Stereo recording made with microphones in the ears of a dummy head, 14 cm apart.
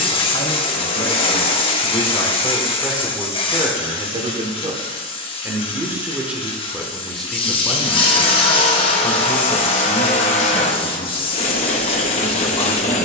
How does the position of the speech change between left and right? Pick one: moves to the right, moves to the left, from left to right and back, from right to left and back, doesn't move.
from left to right and back.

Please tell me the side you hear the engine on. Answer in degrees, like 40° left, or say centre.
40° left.